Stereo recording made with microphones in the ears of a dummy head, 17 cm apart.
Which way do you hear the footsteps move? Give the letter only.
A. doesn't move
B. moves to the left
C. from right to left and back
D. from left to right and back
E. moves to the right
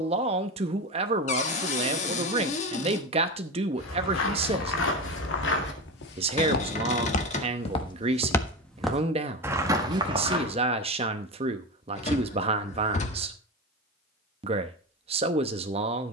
E.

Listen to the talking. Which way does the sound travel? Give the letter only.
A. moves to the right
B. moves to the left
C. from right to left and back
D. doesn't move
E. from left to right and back
D.